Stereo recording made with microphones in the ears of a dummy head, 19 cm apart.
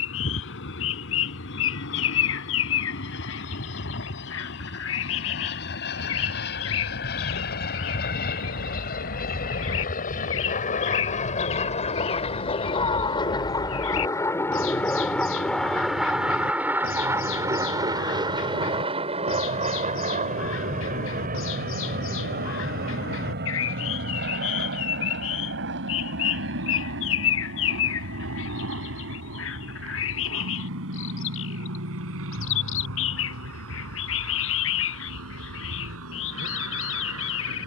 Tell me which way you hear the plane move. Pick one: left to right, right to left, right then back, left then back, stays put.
left to right.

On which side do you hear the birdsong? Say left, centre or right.
left.